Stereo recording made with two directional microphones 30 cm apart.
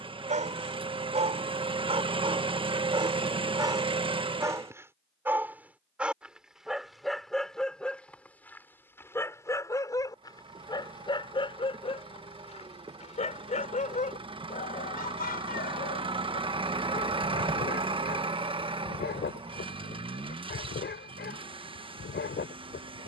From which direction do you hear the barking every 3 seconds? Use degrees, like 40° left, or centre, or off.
20° right, 10° right, centre, 10° left, 20° left, 30° left, 40° left, 40° left.